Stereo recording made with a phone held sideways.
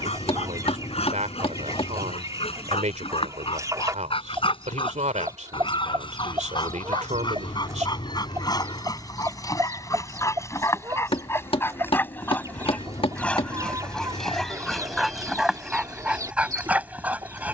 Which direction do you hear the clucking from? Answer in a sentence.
In this clip you hear the clucking on the right.